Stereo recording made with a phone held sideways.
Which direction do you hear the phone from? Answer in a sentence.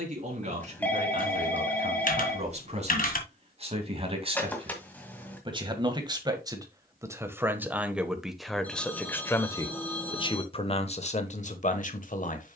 In this clip you hear the phone in the centre.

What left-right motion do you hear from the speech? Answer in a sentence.
You can hear the speech move to the left.